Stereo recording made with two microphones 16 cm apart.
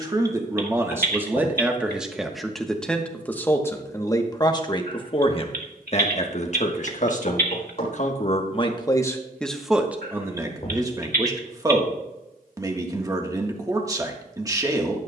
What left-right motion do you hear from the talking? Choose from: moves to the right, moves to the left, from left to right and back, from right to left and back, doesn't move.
from right to left and back.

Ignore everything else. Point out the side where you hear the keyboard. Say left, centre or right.
right.